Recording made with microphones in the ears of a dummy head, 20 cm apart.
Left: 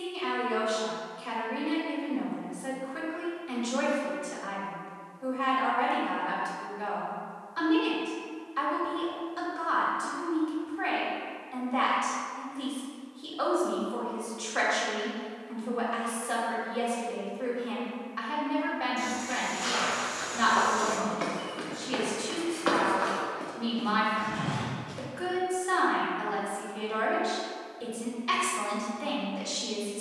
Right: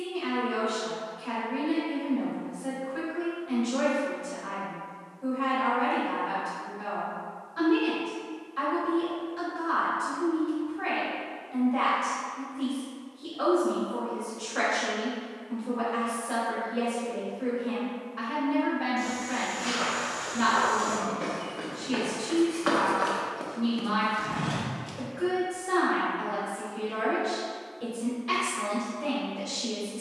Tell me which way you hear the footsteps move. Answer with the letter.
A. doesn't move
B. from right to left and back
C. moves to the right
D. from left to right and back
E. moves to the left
C.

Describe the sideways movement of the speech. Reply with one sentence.
In this clip you hear the speech stay put.